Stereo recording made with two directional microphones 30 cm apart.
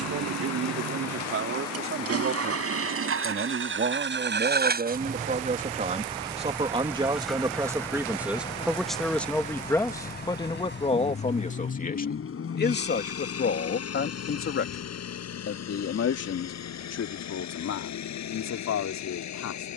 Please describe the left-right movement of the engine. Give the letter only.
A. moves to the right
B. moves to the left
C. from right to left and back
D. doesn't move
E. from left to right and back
B.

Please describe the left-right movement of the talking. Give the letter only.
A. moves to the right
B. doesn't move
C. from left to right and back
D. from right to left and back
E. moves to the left
E.